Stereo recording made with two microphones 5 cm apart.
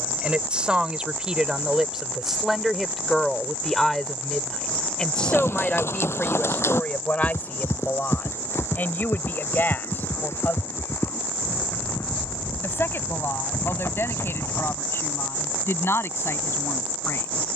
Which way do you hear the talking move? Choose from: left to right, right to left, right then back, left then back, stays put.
right to left.